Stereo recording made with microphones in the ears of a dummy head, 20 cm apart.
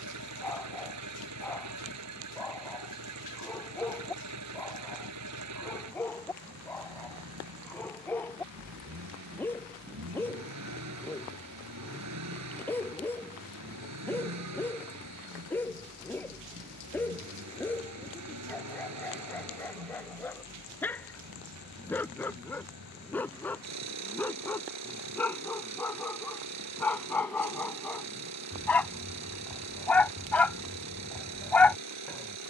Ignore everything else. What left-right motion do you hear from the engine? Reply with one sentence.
In this clip you hear the engine stay put.